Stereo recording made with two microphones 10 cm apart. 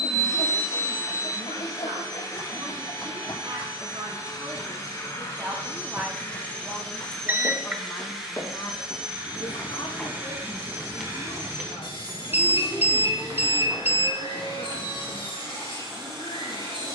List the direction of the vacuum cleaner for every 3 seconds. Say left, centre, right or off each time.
left, left, centre, right, right, right.